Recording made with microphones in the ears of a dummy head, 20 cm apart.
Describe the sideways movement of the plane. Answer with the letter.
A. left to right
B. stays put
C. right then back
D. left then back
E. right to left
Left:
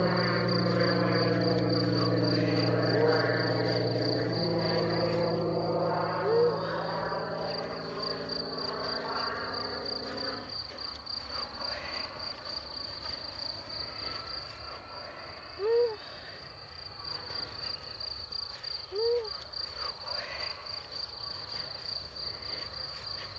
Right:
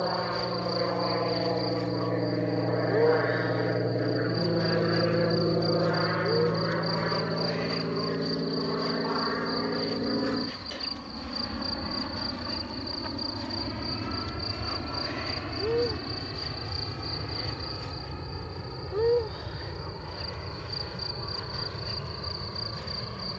A.